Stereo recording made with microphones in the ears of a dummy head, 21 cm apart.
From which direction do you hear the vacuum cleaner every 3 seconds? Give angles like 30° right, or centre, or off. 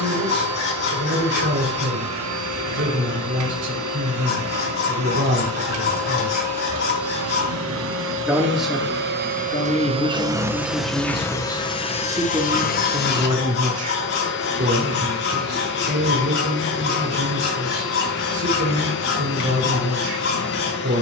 70° right, 70° right, 60° right, 10° right, 40° left, 50° left, 50° left.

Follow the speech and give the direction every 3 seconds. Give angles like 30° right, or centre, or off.
50° right, 50° right, 20° right, 10° left, 30° right, 50° right, 50° right.